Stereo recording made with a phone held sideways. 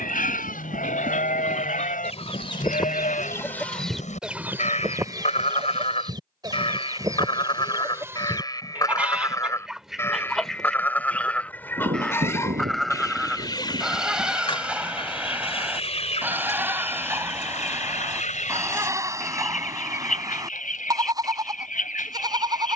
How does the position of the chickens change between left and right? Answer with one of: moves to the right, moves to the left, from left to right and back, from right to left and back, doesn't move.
from left to right and back.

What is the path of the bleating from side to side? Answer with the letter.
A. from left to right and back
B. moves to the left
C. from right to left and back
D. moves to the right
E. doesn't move
D.